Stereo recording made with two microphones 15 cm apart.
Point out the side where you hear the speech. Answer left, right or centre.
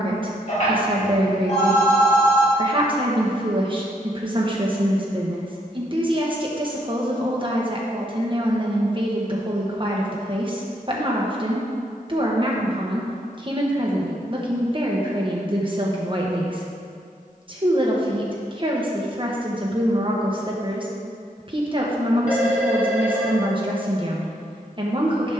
right.